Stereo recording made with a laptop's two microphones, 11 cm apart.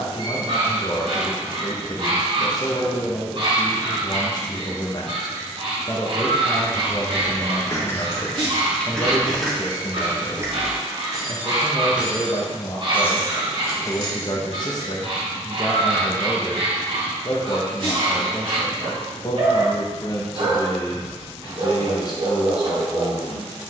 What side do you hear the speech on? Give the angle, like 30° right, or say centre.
40° left.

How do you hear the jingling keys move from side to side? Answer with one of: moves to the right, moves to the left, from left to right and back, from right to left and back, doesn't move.
from left to right and back.